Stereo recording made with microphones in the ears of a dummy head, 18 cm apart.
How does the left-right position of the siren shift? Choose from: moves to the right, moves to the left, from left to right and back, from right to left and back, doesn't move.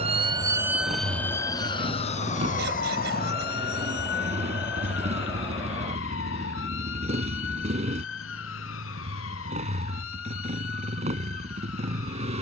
moves to the left.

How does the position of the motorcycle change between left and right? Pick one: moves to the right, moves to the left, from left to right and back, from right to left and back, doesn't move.
doesn't move.